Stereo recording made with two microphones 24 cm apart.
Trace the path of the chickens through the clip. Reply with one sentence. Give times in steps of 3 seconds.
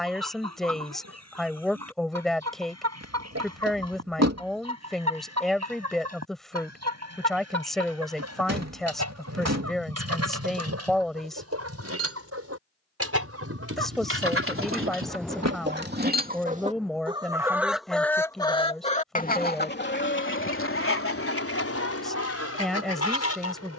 You can hear the chickens on the right from 0 s and on the left from 18 s.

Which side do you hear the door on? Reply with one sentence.
You can hear the door on the right.